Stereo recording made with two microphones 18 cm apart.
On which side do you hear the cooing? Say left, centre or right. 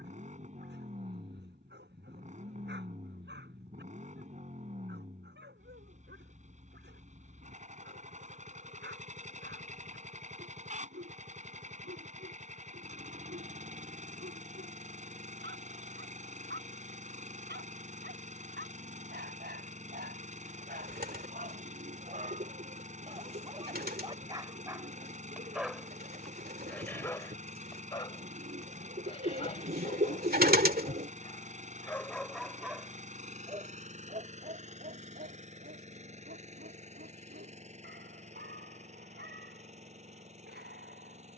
right.